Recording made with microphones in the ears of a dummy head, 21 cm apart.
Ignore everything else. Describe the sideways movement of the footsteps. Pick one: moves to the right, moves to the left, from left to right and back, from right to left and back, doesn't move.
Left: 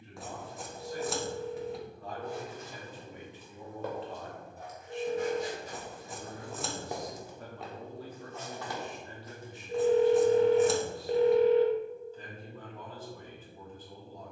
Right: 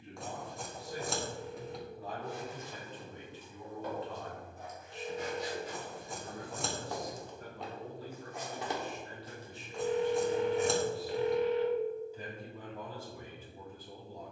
moves to the right.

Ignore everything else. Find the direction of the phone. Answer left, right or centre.
left.